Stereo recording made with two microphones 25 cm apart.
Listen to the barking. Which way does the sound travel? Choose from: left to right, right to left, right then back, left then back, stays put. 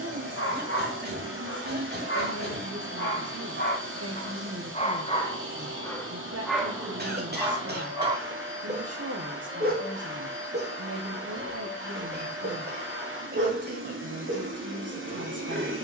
left to right.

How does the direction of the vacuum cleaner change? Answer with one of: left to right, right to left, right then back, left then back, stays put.
stays put.